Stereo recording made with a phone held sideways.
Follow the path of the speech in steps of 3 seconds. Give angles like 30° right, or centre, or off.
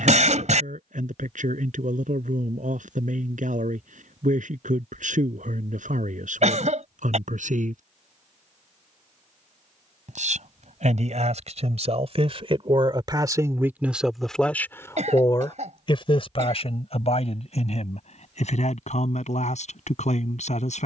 80° right, 80° right, 80° right, 60° right, 20° right, 50° left, 60° left.